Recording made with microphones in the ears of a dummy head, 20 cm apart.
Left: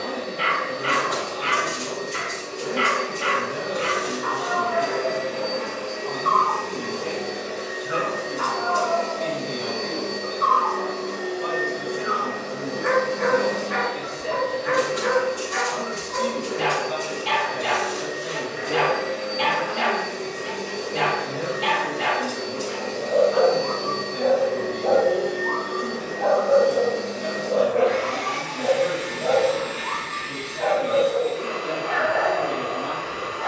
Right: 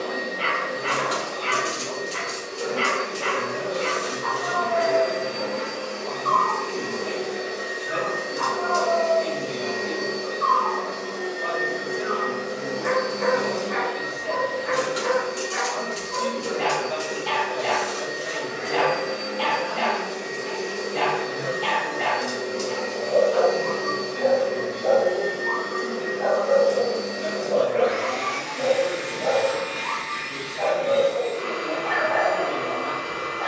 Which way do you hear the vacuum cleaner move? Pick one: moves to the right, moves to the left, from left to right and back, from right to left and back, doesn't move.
doesn't move.